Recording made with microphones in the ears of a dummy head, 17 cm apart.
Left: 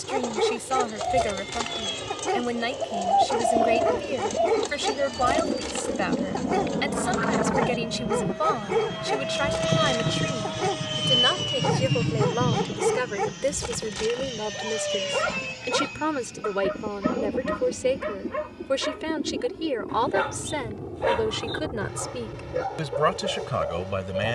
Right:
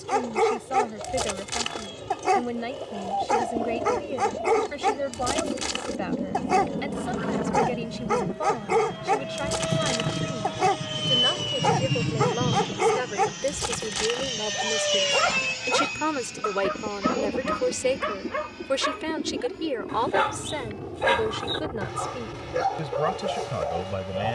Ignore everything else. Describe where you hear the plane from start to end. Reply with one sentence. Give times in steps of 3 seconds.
You can hear the plane on the left from 0 s, in the centre from 9 s and on the right from 12 s.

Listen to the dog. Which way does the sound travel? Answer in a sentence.
In this clip you hear the dog stay in one place.